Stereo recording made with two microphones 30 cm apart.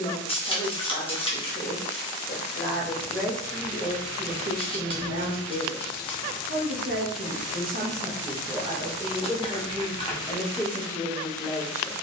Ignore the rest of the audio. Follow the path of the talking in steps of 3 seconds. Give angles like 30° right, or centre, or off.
10° left, 30° right, 30° right, centre.